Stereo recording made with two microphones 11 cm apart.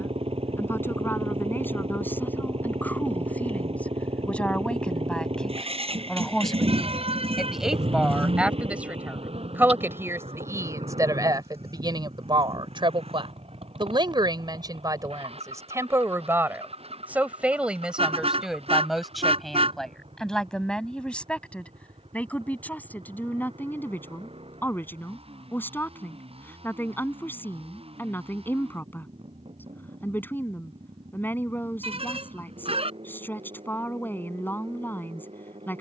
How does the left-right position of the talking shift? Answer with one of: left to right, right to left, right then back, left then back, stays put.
right then back.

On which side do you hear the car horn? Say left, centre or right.
right.